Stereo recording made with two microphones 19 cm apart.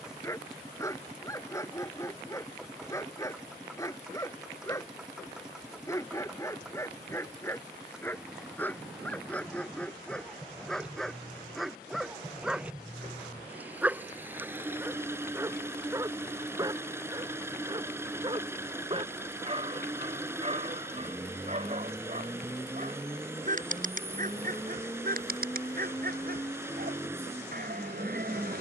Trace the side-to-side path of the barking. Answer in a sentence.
You can hear the barking go from the left side to the right.